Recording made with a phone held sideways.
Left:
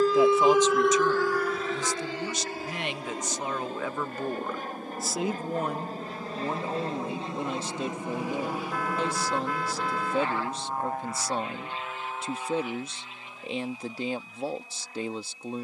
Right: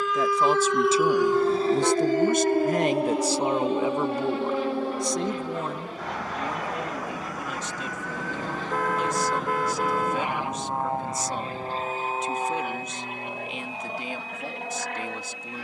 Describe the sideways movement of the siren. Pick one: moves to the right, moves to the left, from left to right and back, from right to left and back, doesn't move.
moves to the right.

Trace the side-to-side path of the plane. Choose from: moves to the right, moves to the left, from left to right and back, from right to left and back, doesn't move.
moves to the right.